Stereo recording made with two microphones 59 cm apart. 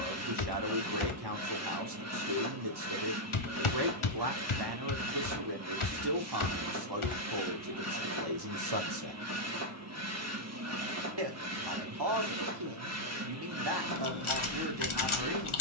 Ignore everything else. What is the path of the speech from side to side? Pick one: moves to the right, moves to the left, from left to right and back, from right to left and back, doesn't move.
doesn't move.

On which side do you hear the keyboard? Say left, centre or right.
left.